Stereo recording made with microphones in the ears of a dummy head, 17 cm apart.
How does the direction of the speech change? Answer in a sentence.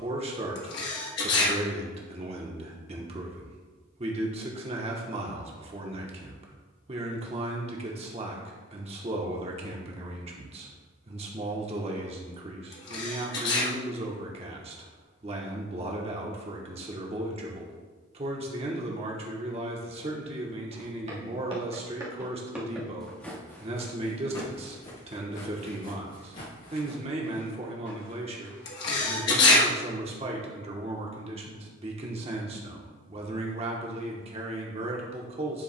In this clip you hear the speech stay put.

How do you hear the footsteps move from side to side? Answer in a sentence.
In this clip you hear the footsteps travel towards the left.